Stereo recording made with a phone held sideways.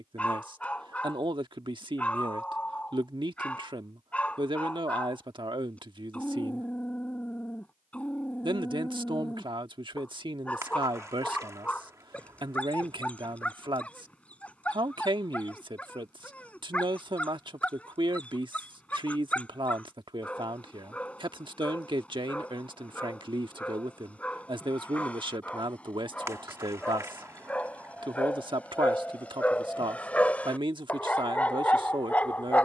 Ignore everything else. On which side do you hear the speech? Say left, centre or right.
right.